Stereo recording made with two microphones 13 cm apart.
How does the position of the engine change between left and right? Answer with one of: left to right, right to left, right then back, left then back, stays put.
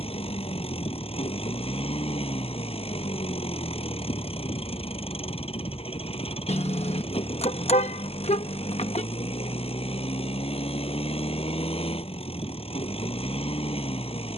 stays put.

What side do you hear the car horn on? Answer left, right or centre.
left.